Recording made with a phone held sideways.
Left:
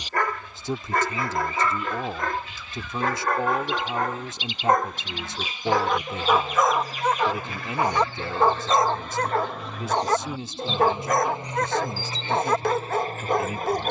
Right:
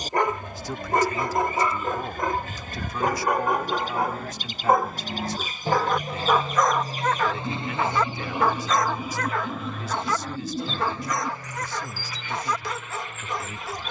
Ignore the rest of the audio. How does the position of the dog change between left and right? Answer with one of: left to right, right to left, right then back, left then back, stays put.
right to left.